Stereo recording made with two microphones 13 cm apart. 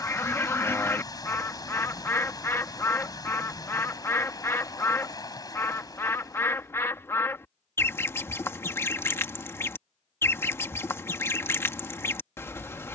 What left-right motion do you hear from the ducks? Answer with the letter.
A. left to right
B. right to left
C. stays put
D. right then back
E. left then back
C.